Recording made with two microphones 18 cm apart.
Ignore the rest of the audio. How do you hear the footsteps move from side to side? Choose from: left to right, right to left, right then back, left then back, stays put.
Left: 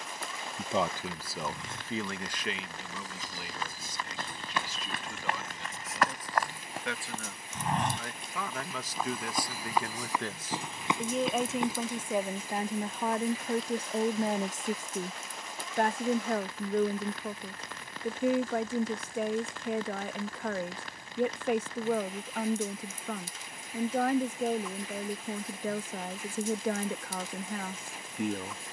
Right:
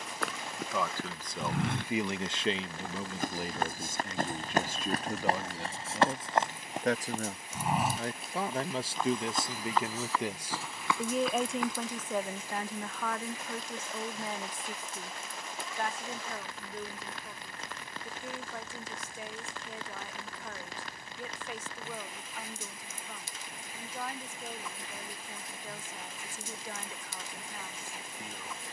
right to left.